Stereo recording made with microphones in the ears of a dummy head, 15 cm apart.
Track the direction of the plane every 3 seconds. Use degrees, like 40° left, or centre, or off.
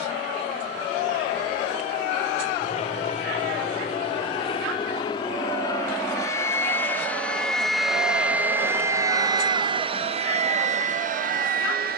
50° left, 30° left, centre, 40° right.